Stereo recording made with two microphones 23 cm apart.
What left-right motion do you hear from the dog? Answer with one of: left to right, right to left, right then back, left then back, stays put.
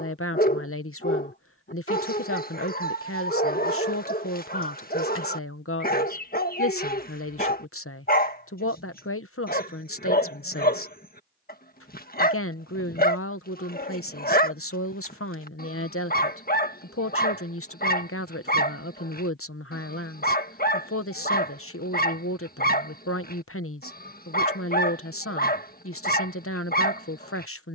stays put.